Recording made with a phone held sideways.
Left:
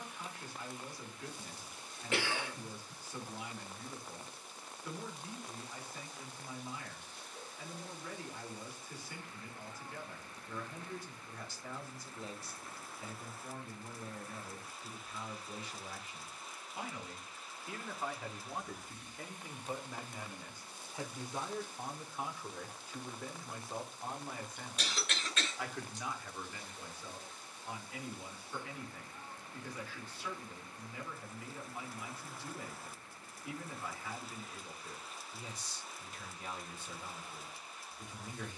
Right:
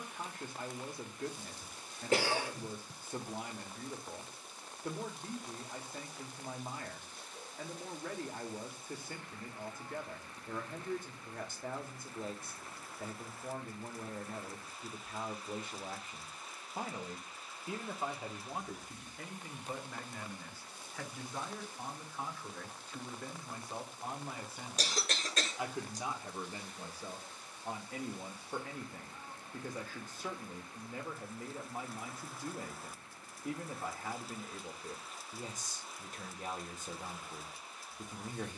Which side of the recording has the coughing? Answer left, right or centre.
right.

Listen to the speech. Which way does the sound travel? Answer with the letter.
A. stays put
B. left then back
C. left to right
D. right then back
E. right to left
B.